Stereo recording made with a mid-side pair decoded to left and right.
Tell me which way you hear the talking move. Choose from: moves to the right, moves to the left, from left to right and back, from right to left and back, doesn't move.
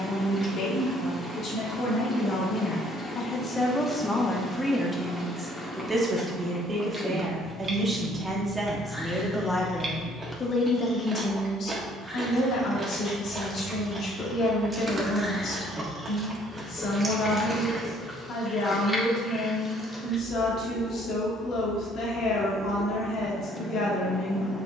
from left to right and back.